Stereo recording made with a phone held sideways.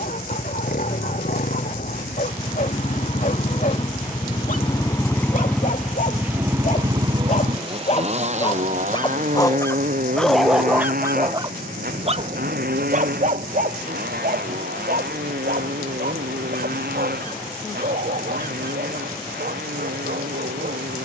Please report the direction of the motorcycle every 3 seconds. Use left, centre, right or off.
left, left, right, right, right, right, right.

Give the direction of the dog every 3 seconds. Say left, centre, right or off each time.
left, left, left, centre, right, right, right.